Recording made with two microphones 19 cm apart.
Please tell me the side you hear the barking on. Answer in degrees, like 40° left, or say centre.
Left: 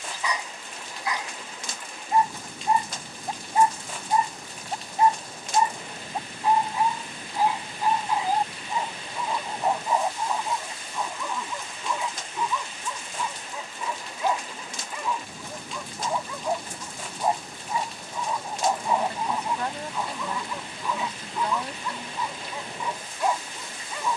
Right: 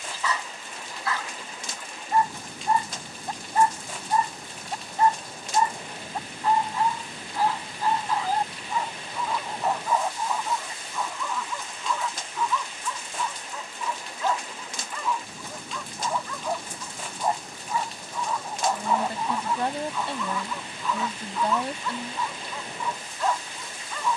20° left.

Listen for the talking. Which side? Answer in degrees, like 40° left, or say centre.
30° right.